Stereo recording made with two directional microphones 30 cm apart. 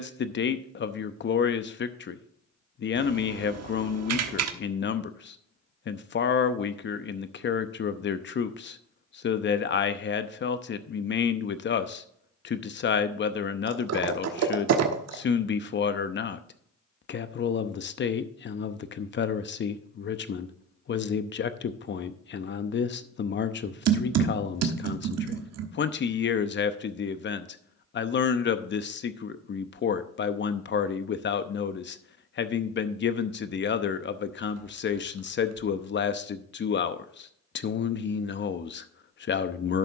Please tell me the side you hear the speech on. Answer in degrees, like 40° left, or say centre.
40° left.